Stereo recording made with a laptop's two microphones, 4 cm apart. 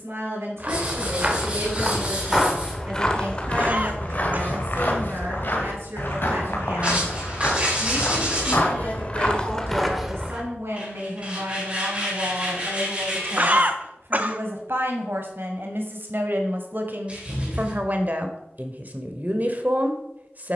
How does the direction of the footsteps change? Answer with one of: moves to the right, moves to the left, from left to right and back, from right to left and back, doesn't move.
from right to left and back.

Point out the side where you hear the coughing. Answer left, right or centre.
right.